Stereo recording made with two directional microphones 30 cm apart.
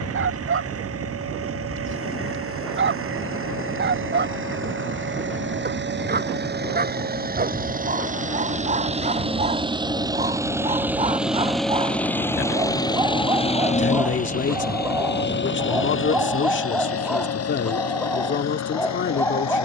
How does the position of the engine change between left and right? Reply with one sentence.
In this clip you hear the engine travel towards the left.